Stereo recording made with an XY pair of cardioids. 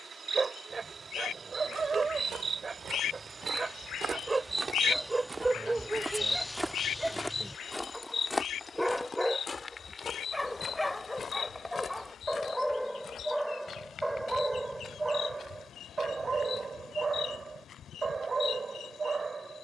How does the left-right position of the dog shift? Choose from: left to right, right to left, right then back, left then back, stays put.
left then back.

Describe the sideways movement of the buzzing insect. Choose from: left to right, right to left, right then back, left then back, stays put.
right to left.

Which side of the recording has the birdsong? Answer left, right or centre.
left.